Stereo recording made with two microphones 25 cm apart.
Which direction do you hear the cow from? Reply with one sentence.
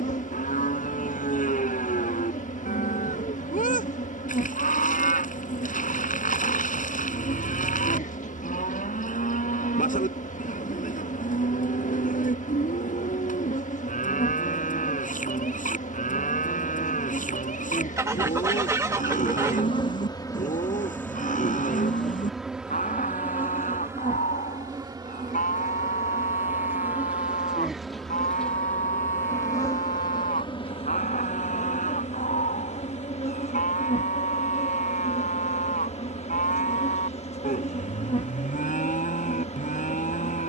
In this clip you hear the cow on the left.